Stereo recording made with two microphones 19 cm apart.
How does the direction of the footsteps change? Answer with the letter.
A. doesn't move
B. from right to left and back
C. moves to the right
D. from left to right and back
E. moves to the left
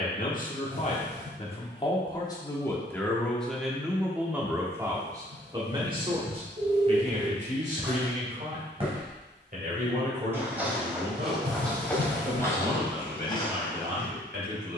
D.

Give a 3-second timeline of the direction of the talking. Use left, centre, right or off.
left, centre, right, right, right.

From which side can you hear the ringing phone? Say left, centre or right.
right.